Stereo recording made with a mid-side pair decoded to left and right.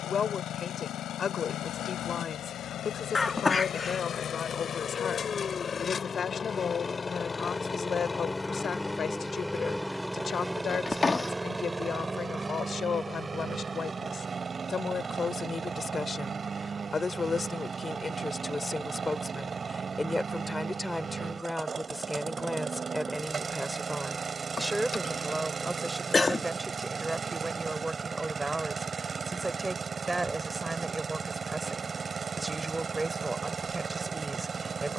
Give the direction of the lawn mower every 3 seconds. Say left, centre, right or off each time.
left, left, left, centre, right, right, right, right, right, right, right, right.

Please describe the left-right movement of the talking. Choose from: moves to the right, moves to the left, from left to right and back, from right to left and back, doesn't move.
moves to the right.